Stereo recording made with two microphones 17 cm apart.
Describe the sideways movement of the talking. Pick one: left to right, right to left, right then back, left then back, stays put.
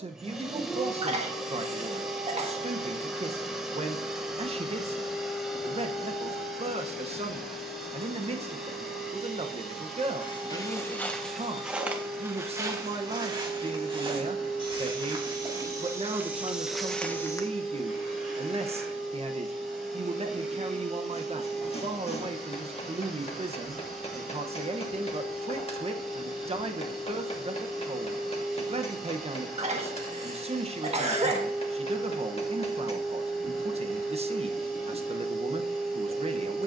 stays put.